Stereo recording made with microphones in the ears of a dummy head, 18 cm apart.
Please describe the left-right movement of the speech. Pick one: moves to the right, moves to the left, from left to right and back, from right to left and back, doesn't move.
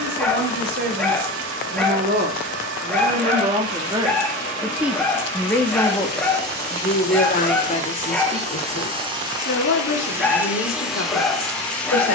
moves to the left.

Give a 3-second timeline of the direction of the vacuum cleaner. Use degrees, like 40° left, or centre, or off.
70° right, 60° right, 40° right, 10° right.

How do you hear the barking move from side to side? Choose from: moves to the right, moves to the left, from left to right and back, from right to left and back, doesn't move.
doesn't move.